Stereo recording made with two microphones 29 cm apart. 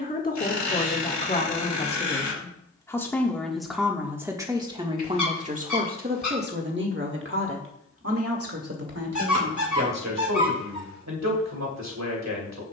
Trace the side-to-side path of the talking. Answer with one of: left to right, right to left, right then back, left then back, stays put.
left to right.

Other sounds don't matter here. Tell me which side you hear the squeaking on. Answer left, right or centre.
left.